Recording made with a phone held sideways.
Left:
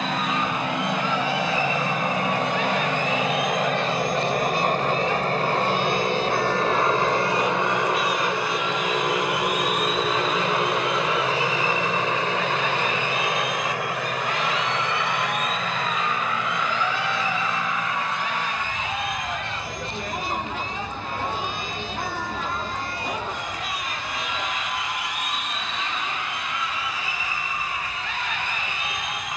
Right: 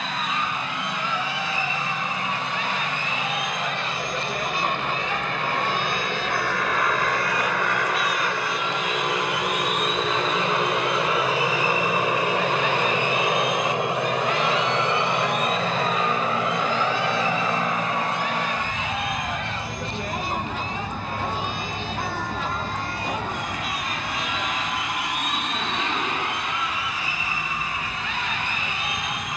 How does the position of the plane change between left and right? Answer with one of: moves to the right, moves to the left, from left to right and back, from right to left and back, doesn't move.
moves to the right.